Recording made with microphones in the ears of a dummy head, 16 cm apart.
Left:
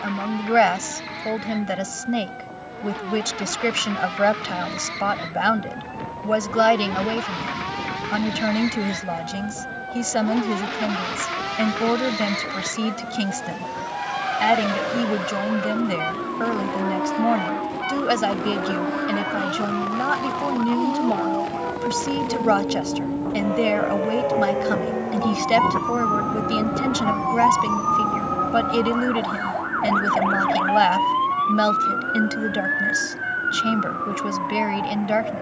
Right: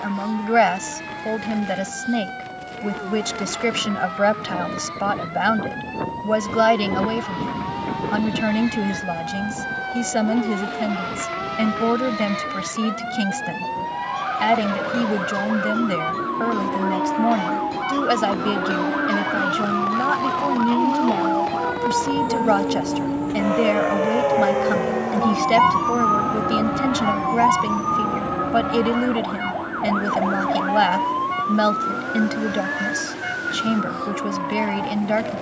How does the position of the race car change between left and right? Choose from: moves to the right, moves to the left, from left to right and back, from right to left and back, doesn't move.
moves to the right.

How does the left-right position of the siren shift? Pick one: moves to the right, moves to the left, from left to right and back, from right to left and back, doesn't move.
moves to the left.